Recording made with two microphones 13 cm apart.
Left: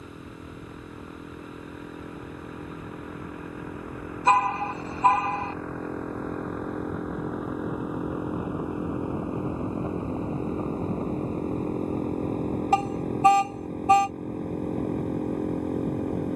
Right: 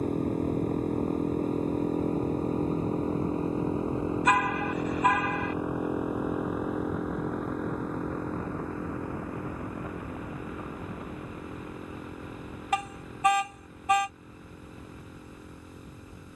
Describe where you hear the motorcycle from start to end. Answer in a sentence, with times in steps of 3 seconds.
In this clip you hear the motorcycle on the right from 0 s, in the centre from 6 s and on the left from 9 s.